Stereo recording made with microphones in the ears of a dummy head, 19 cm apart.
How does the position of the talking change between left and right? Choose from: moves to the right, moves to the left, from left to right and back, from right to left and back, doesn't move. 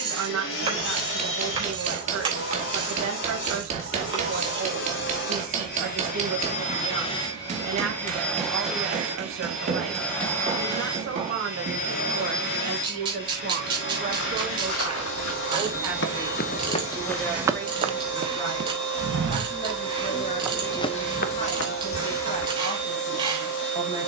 moves to the left.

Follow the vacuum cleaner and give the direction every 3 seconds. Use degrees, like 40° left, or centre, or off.
60° left, 60° left, 20° left, 10° left, 50° left, 60° left, 60° left, 60° left.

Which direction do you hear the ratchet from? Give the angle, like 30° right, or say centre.
20° right.